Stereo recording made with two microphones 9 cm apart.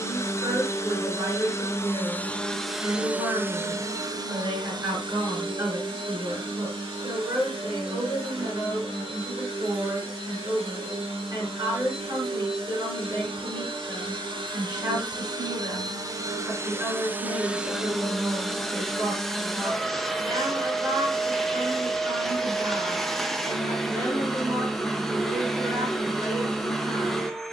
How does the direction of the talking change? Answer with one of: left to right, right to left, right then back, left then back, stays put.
stays put.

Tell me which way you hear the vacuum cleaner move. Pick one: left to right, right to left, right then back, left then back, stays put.
right then back.